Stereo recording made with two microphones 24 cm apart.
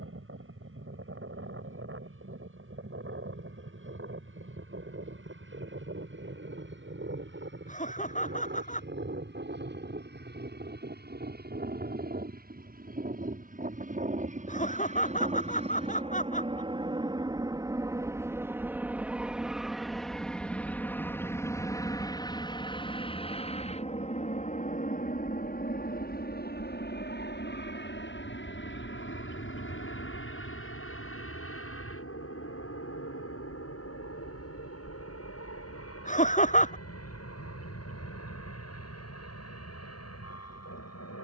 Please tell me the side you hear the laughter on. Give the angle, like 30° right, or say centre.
30° left.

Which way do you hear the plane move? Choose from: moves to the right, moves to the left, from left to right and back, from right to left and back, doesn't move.
moves to the left.